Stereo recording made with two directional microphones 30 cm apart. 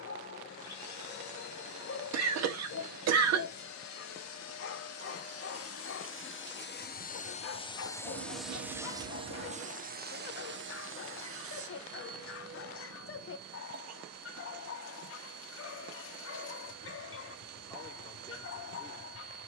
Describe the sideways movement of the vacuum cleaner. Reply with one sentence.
In this clip you hear the vacuum cleaner travel towards the right.